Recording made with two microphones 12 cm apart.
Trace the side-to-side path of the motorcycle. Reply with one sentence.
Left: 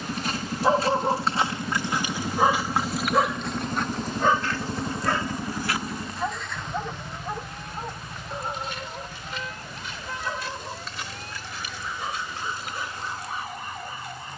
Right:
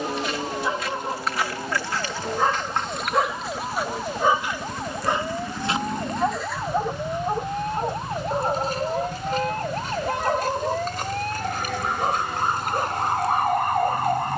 You can hear the motorcycle travel towards the right.